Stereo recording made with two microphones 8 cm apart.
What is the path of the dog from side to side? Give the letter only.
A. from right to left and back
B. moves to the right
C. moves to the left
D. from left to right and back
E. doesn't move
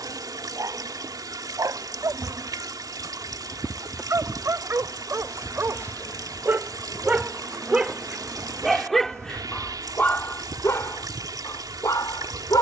C.